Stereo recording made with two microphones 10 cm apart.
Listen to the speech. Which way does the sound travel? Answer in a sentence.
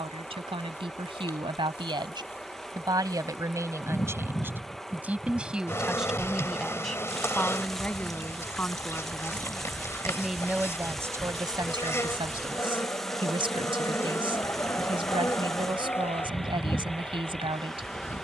In this clip you hear the speech move from right to left and back again.